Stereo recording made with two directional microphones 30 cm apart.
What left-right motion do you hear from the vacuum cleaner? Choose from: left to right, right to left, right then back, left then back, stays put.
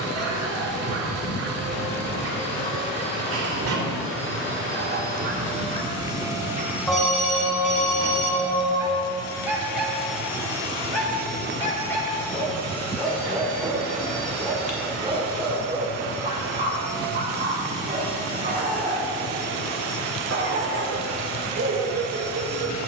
left then back.